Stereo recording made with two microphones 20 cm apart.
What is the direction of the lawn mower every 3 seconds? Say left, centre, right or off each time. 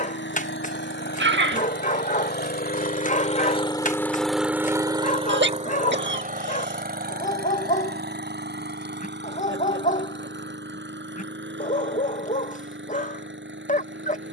left, centre, right, right, right.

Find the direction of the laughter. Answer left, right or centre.
right.